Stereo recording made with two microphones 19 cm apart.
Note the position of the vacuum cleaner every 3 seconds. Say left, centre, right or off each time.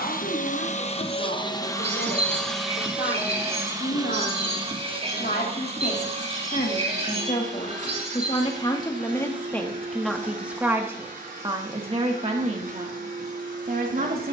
left, right, right, right, right.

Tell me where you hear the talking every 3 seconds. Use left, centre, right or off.
left, left, left, centre, right.